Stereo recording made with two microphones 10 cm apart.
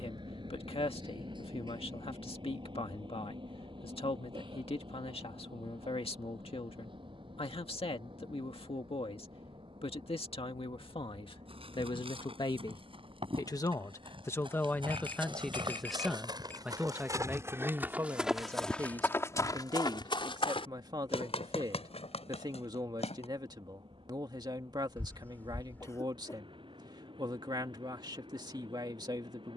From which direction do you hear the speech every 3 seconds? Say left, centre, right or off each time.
left, left, left, left, left, centre, right, right, right, right.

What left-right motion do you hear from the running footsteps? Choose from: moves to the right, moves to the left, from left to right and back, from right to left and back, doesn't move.
moves to the left.